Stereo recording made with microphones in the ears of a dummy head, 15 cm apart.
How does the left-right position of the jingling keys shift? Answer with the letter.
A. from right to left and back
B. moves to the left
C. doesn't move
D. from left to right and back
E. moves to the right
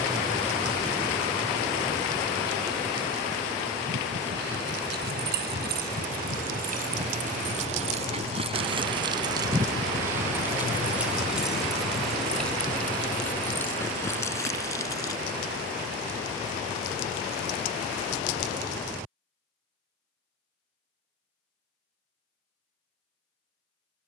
B.